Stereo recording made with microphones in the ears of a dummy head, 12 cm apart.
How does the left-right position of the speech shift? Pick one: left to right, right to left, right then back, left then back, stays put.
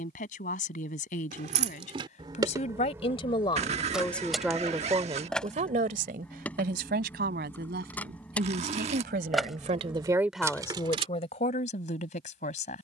right then back.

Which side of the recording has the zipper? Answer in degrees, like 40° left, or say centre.
40° right.